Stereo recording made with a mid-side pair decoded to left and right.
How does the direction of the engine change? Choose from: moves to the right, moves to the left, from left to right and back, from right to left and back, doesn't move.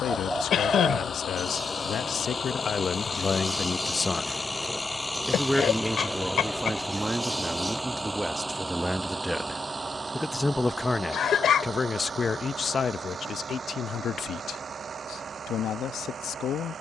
moves to the right.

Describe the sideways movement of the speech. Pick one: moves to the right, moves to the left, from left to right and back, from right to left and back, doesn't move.
from left to right and back.